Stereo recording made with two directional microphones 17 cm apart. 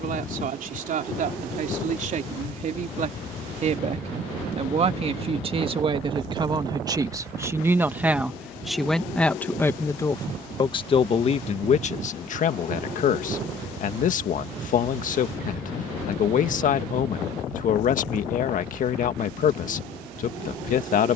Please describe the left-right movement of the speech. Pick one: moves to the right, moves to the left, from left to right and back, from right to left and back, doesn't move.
moves to the left.